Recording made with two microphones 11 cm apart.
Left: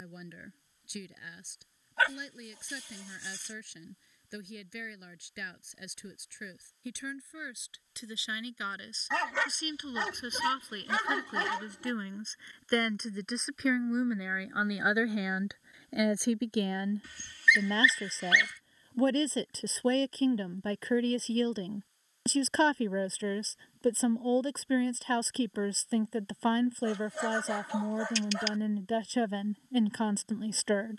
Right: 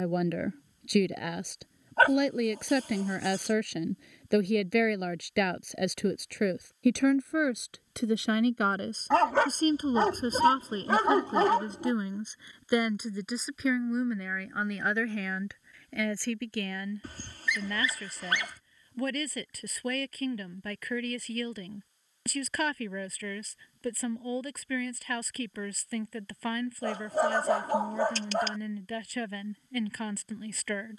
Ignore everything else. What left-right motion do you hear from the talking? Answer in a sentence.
You can hear the talking go from the right side to the left.